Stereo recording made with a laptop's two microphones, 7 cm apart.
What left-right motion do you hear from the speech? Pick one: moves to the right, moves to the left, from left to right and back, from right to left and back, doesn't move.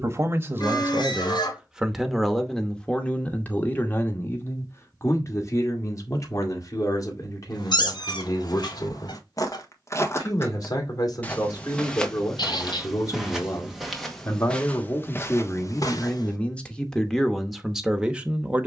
from right to left and back.